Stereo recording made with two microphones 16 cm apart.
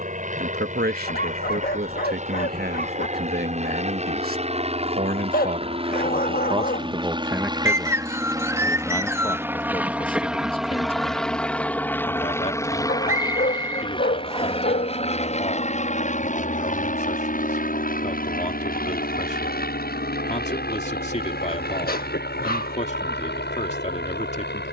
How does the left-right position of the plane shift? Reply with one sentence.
In this clip you hear the plane move to the left.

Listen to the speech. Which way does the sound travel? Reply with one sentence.
In this clip you hear the speech go from the right side to the left.